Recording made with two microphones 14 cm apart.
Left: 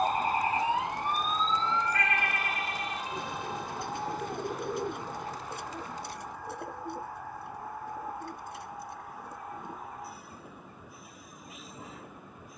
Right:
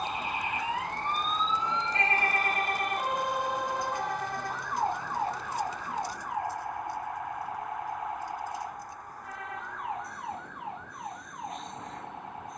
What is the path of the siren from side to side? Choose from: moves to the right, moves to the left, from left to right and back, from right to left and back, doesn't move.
moves to the right.